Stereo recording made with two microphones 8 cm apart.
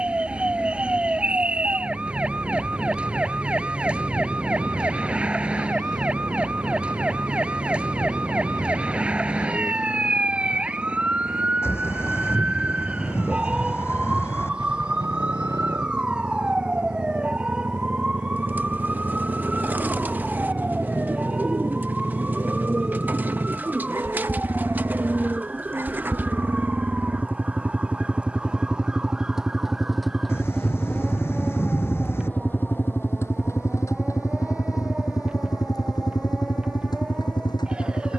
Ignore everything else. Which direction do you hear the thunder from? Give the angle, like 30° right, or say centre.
30° left.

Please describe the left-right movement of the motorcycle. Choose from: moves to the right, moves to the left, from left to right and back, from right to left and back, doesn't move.
moves to the left.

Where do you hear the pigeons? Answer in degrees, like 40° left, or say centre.
20° right.